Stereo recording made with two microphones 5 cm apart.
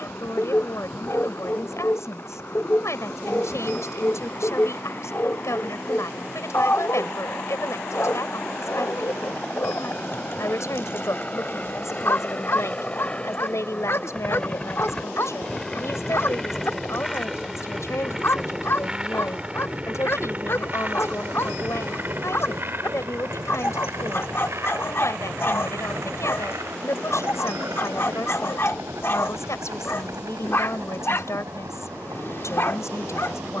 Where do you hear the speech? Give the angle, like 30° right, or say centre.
70° left.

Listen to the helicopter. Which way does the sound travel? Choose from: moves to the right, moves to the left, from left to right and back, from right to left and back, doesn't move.
moves to the right.